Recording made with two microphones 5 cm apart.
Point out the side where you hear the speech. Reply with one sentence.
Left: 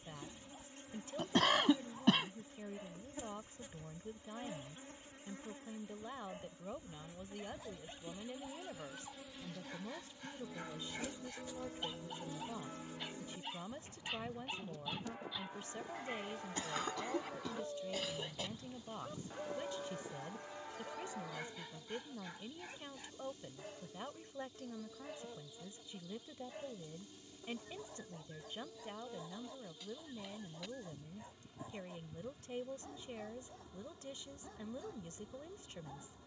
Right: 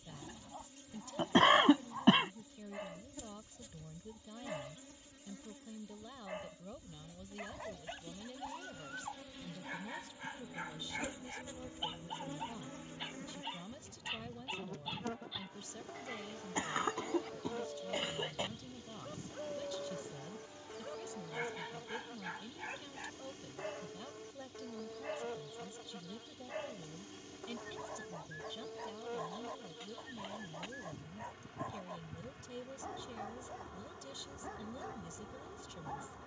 In this clip you hear the speech on the left.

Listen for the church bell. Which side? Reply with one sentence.
You can hear the church bell on the left.